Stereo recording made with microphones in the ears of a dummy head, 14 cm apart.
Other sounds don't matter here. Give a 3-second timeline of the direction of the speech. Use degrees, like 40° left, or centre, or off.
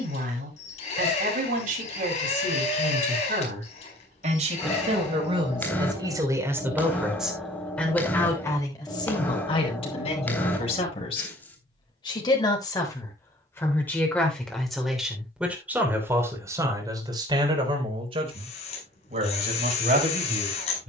60° right, 50° right, centre, 40° left, 20° left, 20° right, 50° right.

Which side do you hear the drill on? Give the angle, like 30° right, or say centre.
40° left.